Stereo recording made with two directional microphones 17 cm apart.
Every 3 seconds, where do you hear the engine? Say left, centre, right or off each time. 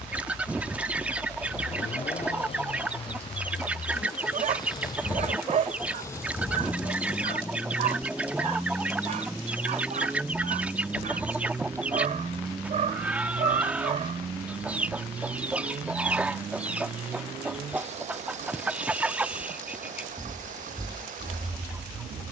left, left, centre, centre, right, right, right, right.